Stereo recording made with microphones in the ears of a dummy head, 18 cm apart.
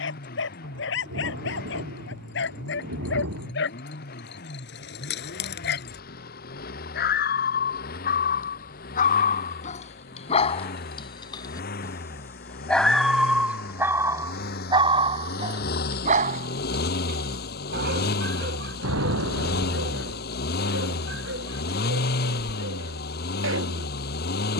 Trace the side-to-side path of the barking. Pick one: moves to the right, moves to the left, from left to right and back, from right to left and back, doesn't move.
moves to the right.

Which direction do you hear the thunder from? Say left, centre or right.
right.